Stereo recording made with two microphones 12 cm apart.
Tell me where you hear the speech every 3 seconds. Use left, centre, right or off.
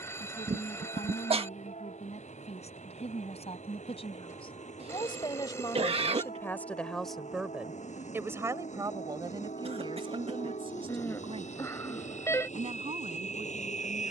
left, left, centre, right, right.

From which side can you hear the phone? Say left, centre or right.
left.